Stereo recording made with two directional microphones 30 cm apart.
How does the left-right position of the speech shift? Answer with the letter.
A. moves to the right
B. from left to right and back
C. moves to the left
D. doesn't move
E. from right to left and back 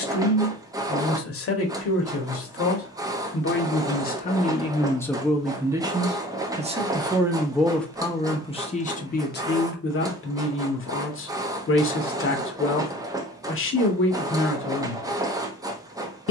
B.